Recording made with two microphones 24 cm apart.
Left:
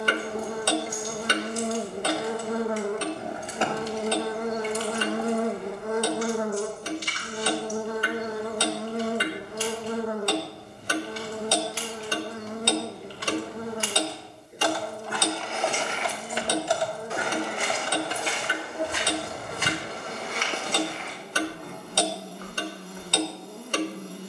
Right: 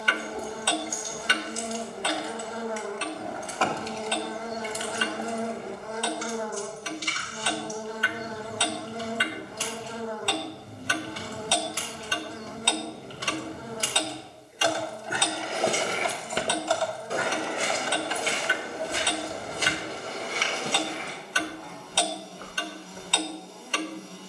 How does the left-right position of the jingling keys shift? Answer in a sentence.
In this clip you hear the jingling keys move from left to right and back again.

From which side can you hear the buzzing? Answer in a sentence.
You can hear the buzzing on the left.